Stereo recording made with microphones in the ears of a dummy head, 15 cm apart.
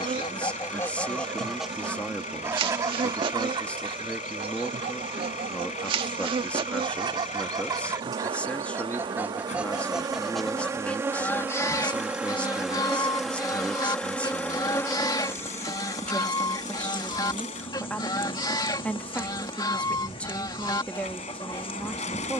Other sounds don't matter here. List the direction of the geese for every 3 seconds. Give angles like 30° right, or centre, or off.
centre, 30° right, 20° right, centre, 20° left, 20° left, 20° left, 20° left.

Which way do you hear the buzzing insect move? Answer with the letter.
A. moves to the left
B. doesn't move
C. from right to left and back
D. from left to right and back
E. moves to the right
A.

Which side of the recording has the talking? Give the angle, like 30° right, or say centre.
10° left.